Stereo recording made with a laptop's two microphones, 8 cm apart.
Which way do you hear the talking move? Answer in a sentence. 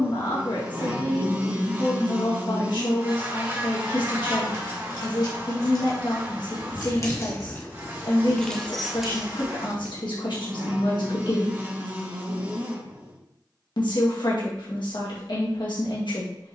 In this clip you hear the talking stay put.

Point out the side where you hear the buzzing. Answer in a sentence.
You can hear the buzzing on the right.